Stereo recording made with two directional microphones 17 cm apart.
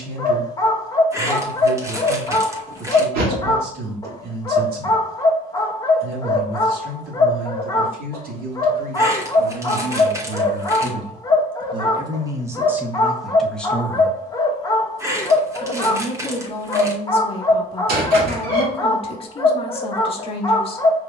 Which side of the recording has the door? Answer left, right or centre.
right.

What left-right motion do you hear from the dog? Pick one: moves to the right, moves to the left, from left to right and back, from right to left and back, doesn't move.
doesn't move.